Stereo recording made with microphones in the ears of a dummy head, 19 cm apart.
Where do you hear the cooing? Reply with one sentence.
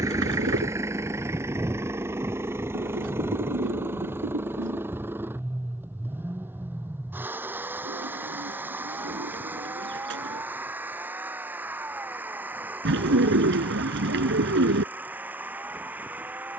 In this clip you hear the cooing on the right.